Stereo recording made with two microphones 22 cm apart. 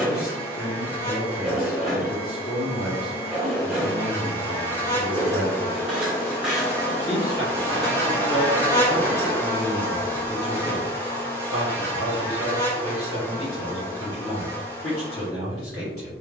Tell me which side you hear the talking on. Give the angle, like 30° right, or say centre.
80° left.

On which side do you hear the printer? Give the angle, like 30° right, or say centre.
centre.